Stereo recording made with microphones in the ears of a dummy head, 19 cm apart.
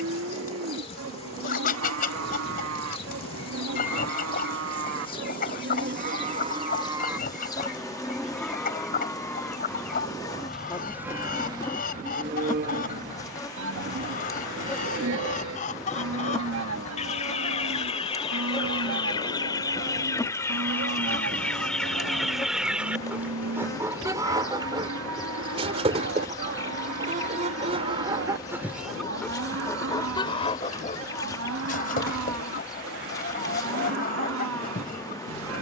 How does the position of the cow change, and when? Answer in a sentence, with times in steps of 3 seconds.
In this clip you hear the cow on the right from 0 s, in the centre from 6 s and on the right from 12 s.